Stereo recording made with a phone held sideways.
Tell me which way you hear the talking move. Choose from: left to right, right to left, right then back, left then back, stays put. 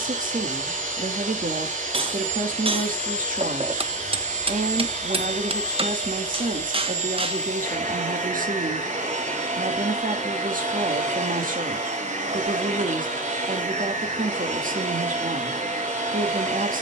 stays put.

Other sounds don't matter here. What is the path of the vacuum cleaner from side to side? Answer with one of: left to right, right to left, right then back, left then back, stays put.
stays put.